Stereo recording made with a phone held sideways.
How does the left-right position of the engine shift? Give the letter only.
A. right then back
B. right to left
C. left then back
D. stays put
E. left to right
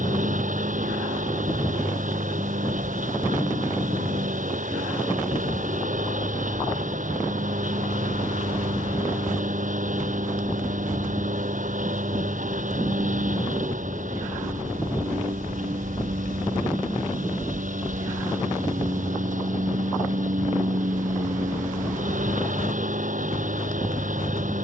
D.